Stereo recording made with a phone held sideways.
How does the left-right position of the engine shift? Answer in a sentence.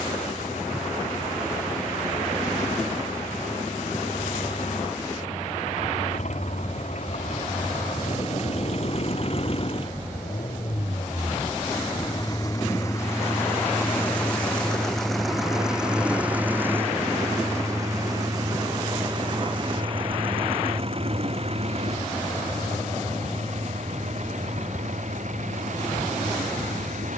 In this clip you hear the engine move to the right.